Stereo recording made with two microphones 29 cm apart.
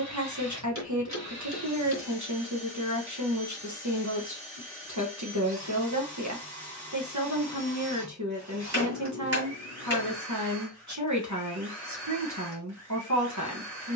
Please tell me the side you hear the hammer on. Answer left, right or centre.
right.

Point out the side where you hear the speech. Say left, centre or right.
right.